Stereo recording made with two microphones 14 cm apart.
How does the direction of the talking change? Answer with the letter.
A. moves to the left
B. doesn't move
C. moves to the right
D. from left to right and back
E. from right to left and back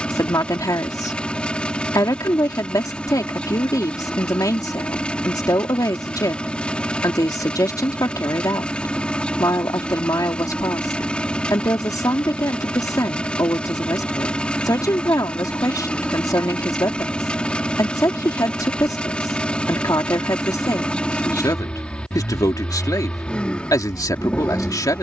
B.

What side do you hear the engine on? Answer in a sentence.
In this clip you hear the engine in the centre.